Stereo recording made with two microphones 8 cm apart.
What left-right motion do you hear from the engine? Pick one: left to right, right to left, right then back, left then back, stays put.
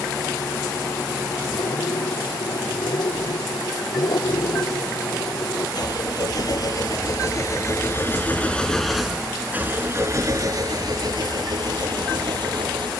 left to right.